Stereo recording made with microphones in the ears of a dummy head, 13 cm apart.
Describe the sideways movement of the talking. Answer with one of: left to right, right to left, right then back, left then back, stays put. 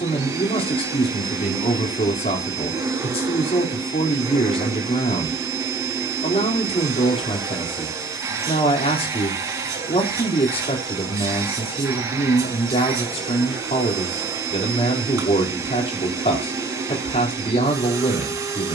stays put.